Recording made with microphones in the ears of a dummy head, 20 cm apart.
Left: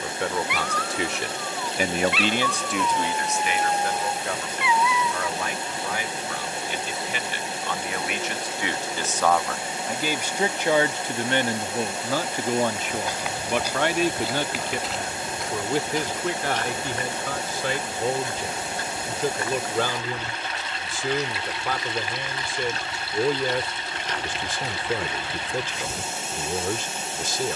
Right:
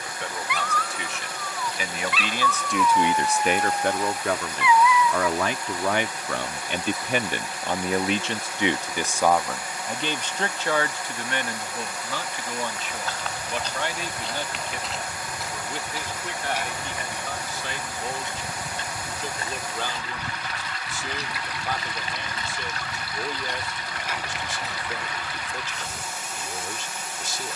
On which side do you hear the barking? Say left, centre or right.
right.